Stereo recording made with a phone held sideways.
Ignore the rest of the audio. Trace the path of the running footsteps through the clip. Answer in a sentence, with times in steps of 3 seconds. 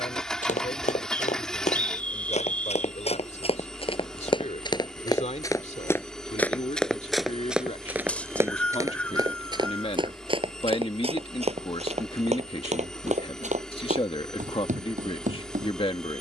You can hear the running footsteps on the left from 0 s, in the centre from 6 s and on the right from 9 s.